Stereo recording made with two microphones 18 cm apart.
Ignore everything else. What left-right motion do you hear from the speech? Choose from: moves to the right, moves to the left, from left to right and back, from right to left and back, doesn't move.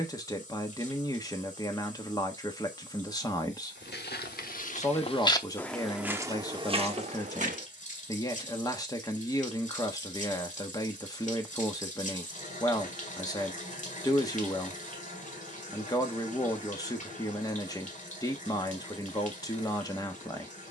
doesn't move.